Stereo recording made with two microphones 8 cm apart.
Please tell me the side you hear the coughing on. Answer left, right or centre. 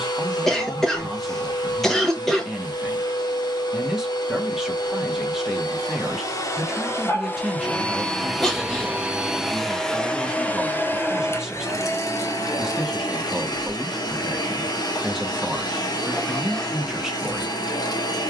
centre.